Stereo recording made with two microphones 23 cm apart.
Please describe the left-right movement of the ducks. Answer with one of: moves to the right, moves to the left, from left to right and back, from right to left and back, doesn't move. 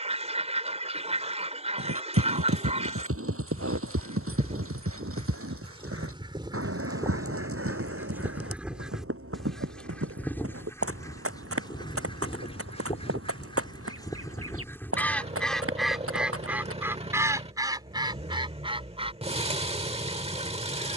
from right to left and back.